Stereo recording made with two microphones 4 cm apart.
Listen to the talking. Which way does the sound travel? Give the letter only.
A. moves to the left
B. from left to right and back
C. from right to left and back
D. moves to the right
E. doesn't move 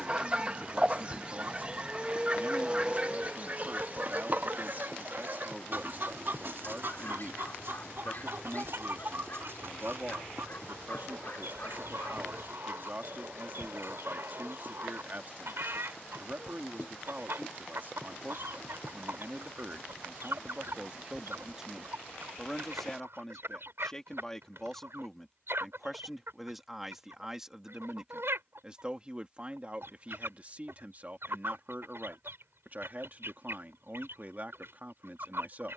C.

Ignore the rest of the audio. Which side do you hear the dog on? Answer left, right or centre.
left.